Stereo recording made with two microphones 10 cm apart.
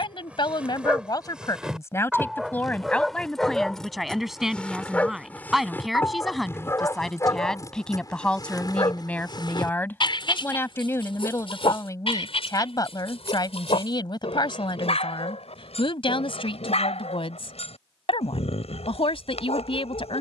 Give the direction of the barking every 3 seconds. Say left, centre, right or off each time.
centre, centre, left, left, left, left, left.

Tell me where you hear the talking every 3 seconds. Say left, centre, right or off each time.
left, centre, centre, left, left, left, left.